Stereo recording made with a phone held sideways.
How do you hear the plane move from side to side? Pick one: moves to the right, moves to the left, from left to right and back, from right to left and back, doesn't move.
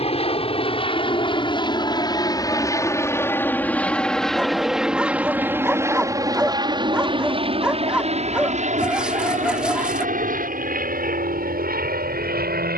moves to the right.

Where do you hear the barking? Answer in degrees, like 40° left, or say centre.
10° right.